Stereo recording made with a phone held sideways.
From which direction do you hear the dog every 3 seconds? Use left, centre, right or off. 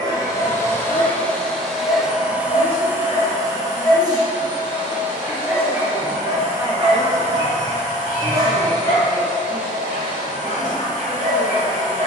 left, centre, right, right.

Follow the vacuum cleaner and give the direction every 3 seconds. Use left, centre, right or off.
centre, right, right, right.